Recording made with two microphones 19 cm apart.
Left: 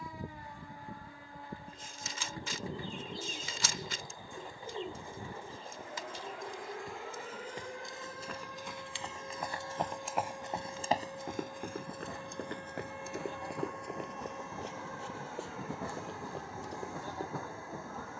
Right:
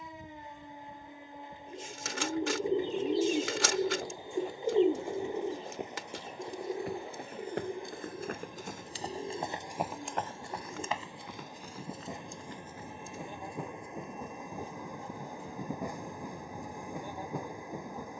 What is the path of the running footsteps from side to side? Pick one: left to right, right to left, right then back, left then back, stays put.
right to left.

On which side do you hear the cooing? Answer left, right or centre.
right.